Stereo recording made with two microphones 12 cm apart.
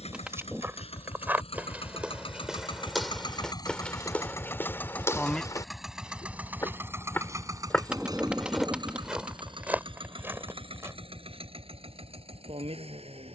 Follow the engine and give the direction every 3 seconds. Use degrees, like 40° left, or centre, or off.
60° left, 20° left, 30° right, 50° right, 60° right.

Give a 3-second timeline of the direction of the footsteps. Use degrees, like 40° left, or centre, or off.
10° right, 20° left, 20° left, 20° right, off.